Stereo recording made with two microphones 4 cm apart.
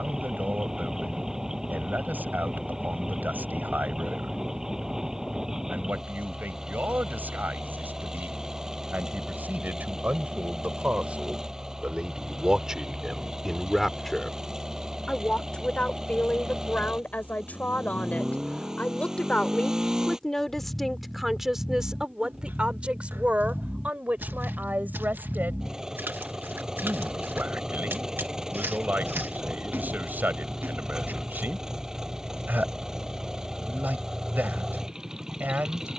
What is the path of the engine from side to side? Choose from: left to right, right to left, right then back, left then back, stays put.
stays put.